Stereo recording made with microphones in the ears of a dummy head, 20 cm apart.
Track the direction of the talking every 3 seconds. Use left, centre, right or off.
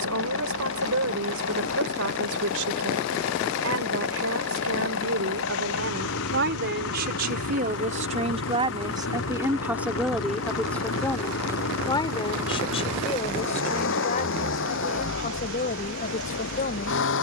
right, right, right, centre, left, left.